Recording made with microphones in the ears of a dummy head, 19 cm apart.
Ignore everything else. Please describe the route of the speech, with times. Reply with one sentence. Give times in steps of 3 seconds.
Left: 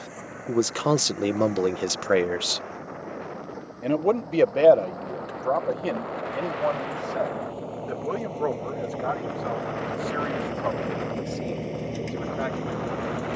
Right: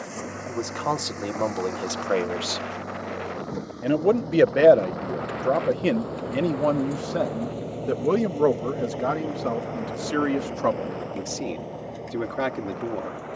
In this clip you hear the speech on the left from 0 s and on the right from 3 s.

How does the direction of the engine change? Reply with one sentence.
In this clip you hear the engine move to the left.